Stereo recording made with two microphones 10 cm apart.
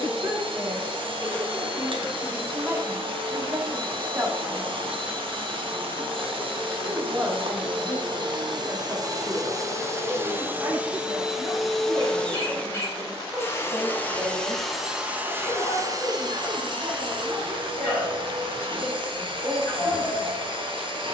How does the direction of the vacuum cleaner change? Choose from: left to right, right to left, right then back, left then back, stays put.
left then back.